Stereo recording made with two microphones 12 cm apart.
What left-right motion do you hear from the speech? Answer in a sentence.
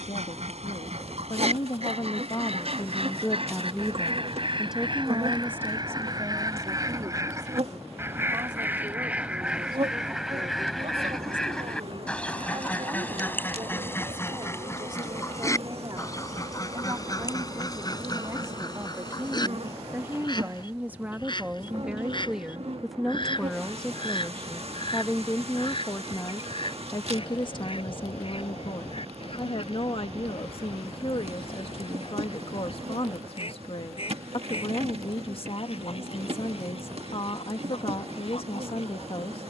You can hear the speech move from left to right and back again.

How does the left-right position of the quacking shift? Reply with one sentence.
You can hear the quacking move to the left.